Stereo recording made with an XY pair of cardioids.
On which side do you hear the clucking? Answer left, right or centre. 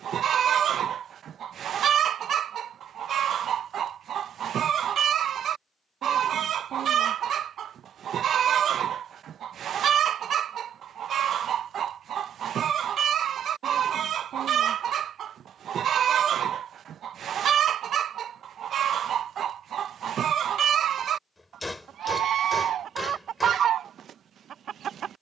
right.